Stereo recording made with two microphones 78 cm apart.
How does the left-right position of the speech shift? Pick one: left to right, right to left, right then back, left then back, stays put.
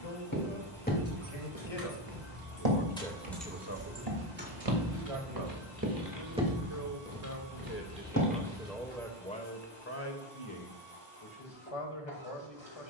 right then back.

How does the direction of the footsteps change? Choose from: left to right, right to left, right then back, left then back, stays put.
right then back.